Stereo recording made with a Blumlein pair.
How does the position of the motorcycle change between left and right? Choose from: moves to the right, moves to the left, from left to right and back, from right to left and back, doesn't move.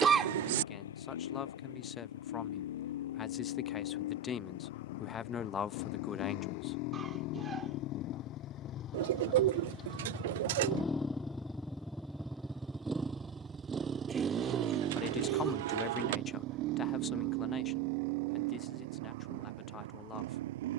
moves to the right.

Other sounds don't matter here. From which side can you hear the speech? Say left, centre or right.
left.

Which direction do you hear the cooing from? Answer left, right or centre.
right.